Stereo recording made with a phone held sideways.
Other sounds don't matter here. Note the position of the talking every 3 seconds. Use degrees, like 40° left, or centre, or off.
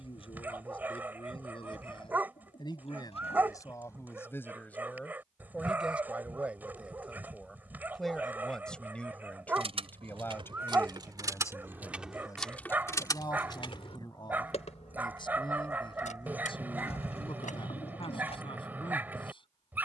40° left, 20° left, centre, 20° left, 30° left, 40° left, 40° left.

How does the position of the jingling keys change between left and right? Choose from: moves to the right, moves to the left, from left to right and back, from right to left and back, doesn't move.
moves to the left.